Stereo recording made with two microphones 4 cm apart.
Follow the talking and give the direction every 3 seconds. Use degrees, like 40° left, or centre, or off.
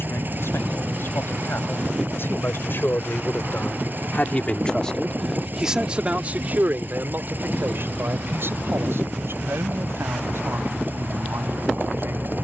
70° left, 30° left, 50° right, 70° right.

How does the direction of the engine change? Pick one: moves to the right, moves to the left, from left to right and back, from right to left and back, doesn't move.
doesn't move.